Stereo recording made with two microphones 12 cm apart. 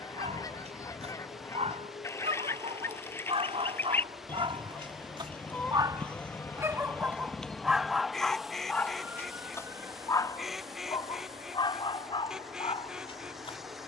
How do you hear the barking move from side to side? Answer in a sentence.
You can hear the barking go from the right side to the left.